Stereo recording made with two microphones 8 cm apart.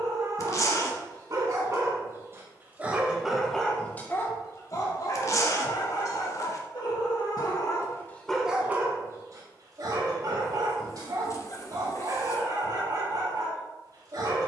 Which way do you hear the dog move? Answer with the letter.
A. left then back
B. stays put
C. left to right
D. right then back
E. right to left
A.